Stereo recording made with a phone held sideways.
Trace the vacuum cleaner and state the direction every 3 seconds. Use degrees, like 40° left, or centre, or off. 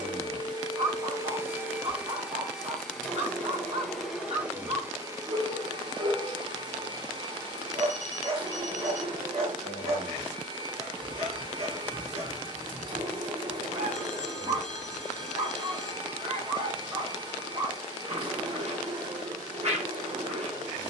20° right, 10° right, 30° right, 30° right, 30° right, 30° right, 30° right.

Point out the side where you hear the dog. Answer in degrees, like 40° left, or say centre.
50° right.